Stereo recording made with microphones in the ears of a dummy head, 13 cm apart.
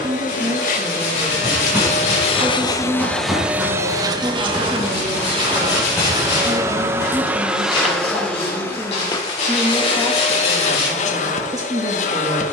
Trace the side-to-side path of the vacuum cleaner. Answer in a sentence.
In this clip you hear the vacuum cleaner move from left to right and back again.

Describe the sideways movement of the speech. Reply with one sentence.
In this clip you hear the speech go left and come back.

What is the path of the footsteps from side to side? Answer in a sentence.
In this clip you hear the footsteps move to the left.